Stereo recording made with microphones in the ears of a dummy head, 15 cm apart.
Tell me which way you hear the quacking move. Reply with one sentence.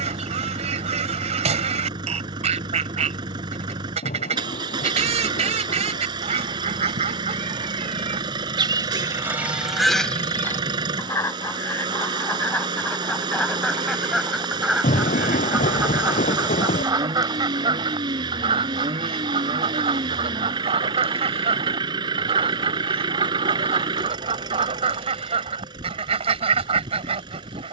In this clip you hear the quacking move from right to left and back again.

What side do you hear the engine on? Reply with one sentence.
In this clip you hear the engine on the right.